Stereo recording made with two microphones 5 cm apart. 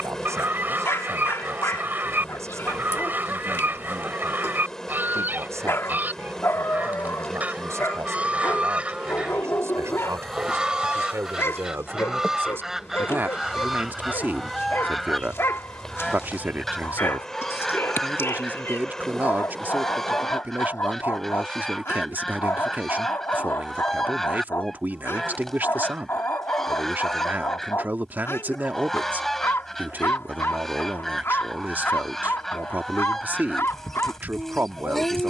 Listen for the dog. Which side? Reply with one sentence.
You can hear the dog on the left.